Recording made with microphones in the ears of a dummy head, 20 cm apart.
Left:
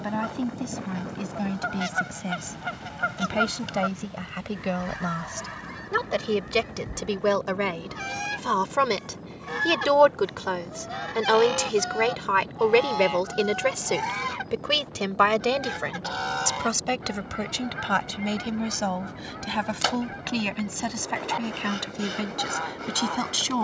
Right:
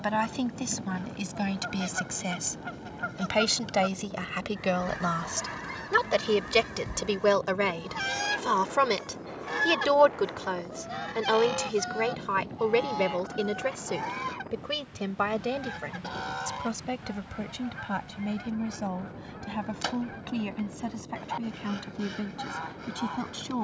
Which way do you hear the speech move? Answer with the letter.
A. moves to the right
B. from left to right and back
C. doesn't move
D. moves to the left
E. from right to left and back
D.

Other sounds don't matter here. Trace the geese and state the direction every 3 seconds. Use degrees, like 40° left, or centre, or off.
30° left, 10° left, 40° right, centre, 20° left, 30° left, 30° left, 30° left.